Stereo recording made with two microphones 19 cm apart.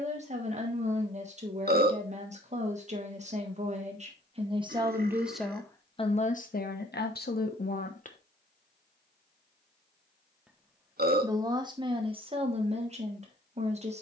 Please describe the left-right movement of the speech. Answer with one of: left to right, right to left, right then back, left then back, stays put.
left then back.